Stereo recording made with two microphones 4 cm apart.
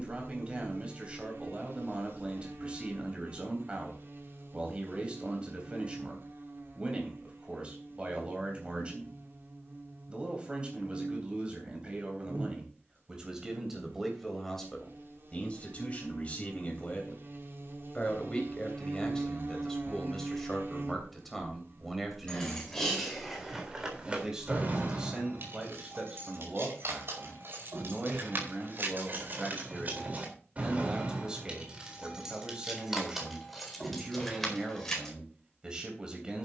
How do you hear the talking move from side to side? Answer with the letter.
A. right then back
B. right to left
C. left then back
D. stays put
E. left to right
C.